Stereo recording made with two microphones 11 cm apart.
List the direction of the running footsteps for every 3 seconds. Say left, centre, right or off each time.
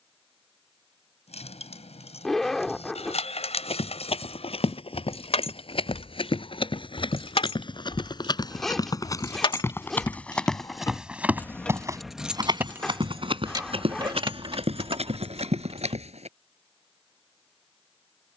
off, left, left, centre, right, right.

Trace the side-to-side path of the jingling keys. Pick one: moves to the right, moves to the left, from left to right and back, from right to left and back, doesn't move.
moves to the right.